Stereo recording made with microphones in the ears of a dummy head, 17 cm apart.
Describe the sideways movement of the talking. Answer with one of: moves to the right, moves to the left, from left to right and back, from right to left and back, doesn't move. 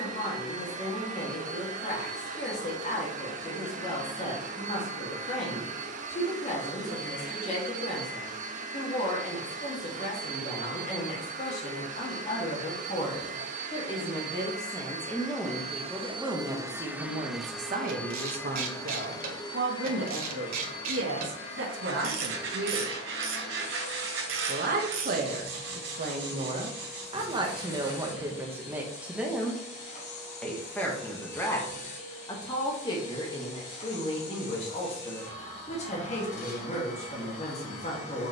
from left to right and back.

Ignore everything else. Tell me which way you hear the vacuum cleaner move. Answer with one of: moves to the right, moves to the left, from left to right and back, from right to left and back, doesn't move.
moves to the left.